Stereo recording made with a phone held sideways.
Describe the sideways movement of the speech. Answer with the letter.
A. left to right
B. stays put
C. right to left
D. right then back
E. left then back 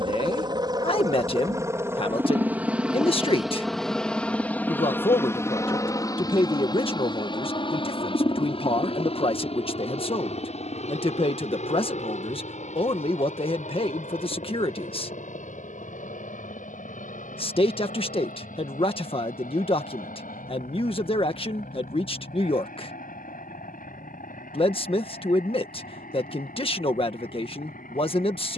B.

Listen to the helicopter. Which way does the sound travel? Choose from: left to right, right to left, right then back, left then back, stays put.
right to left.